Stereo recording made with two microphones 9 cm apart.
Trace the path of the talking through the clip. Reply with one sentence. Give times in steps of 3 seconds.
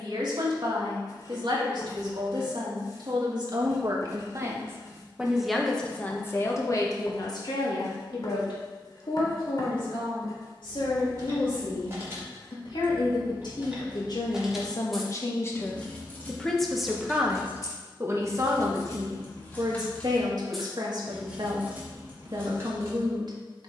You can hear the talking on the right from 0 s, on the left from 6 s, in the centre from 15 s and on the right from 18 s.